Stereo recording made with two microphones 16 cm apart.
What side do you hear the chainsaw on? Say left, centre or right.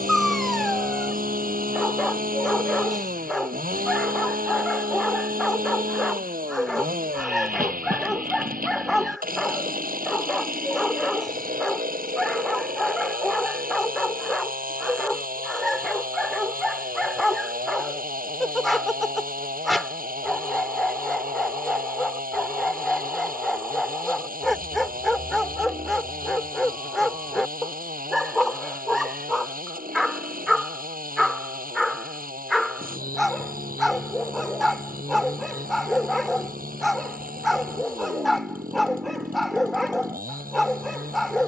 right.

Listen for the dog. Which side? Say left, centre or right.
centre.